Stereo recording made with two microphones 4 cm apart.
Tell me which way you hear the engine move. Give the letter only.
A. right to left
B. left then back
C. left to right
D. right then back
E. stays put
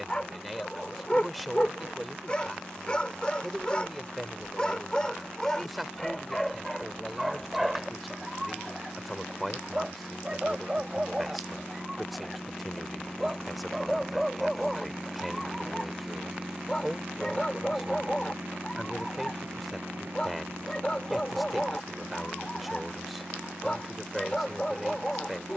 C.